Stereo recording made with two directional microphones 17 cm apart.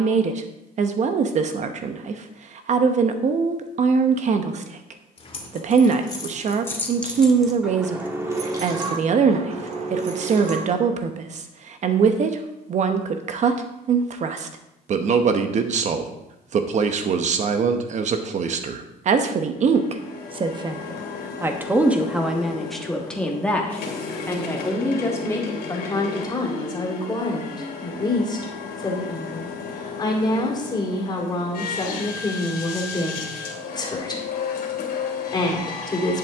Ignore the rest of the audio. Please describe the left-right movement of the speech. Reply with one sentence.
In this clip you hear the speech travel towards the left.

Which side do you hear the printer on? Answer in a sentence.
You can hear the printer on the left.